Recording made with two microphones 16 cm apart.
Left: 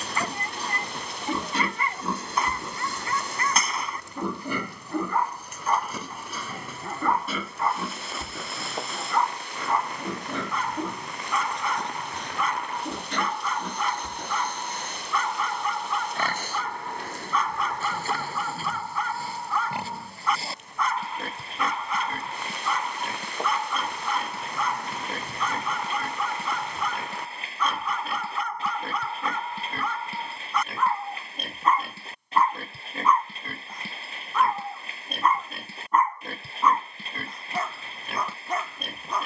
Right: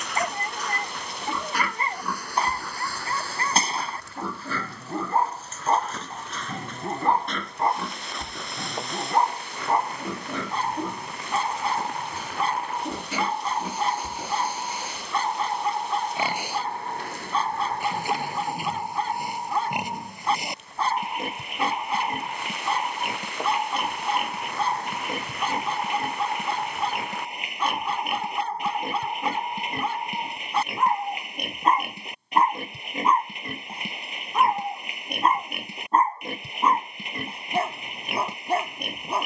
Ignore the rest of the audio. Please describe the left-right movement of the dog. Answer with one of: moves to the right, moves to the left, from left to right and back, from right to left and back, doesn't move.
doesn't move.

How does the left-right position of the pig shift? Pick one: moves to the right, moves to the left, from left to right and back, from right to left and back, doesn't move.
moves to the right.